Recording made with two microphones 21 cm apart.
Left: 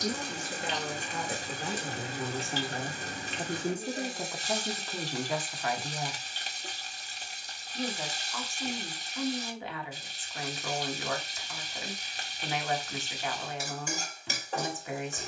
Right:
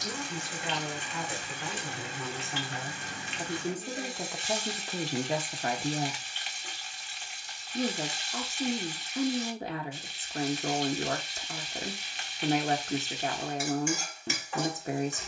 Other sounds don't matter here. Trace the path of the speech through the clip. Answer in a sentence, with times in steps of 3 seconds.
In this clip you hear the speech on the left from 0 s, in the centre from 3 s and on the right from 6 s.